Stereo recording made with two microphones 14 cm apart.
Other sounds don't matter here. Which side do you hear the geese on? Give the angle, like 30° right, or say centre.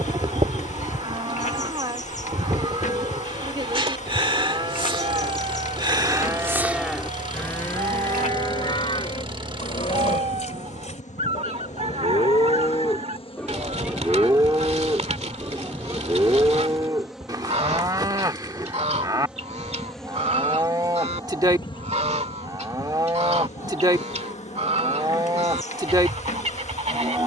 50° right.